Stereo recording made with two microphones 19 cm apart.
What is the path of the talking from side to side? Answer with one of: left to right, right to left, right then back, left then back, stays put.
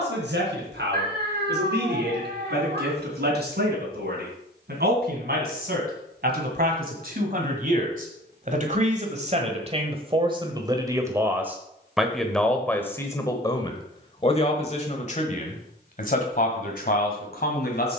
right to left.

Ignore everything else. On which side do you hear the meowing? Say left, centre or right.
right.